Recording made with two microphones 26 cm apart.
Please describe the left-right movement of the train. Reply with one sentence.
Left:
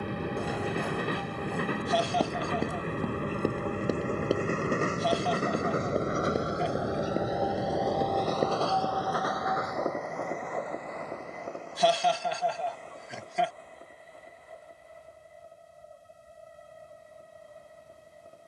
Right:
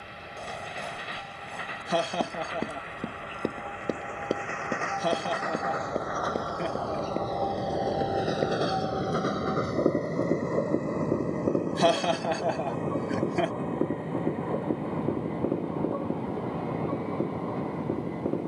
In this clip you hear the train move from left to right.